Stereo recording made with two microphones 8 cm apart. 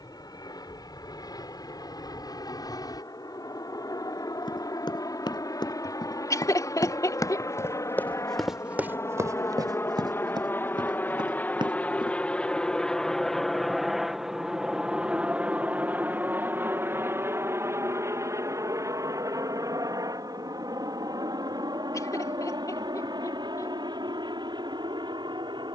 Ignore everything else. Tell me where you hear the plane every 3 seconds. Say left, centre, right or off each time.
left, left, left, left, centre, right, right, right, right.